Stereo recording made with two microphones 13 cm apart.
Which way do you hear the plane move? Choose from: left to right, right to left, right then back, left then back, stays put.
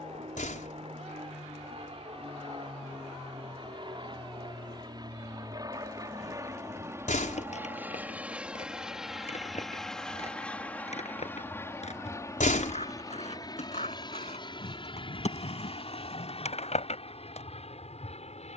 right to left.